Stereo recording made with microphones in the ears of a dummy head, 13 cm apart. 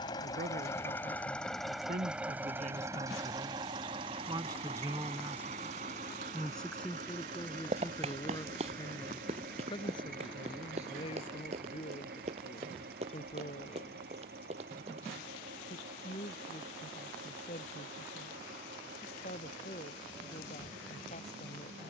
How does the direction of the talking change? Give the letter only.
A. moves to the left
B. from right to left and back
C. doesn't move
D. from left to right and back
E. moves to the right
A.